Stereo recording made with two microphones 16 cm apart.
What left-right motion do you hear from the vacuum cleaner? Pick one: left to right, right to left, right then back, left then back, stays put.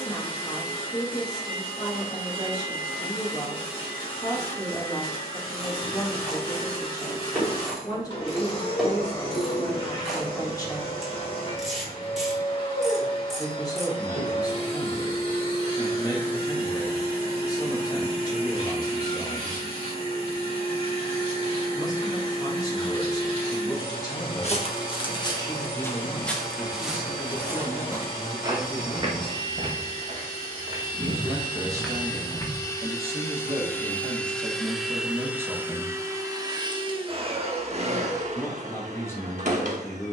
left to right.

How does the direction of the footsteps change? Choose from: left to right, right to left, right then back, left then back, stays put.
right then back.